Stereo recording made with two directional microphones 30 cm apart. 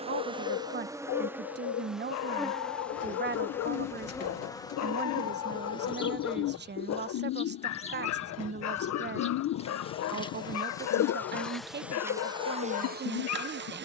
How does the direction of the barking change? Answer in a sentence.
In this clip you hear the barking stay put.